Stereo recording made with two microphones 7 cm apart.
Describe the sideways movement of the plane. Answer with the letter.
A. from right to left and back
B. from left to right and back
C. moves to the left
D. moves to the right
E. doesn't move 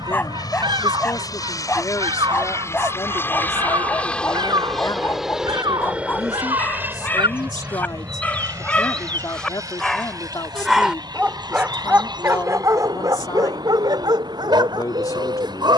D.